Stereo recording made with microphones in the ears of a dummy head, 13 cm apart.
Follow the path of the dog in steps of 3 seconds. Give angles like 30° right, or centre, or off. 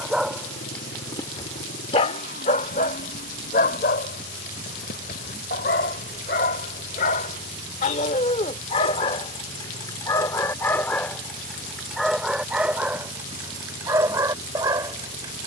30° left, 70° left, 50° left, 20° left, 10° right.